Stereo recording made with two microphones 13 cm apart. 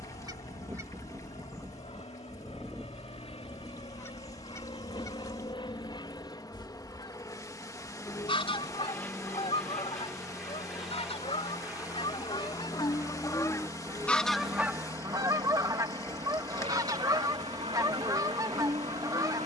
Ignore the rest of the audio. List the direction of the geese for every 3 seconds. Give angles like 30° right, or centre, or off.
10° right, 20° left, 40° left, 50° left, 20° left, 30° right, 30° right.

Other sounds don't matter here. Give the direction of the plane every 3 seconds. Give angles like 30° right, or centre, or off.
60° left, 40° left, 20° left, centre, 20° right, 40° right, 50° right.